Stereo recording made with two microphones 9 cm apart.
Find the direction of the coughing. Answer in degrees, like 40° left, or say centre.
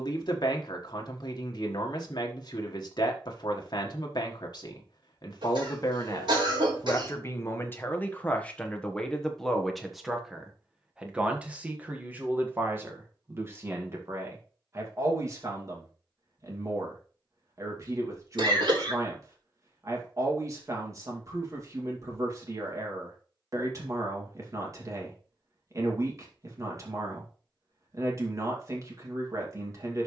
60° right.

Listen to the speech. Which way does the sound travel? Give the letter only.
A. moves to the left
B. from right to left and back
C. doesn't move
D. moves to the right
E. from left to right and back
D.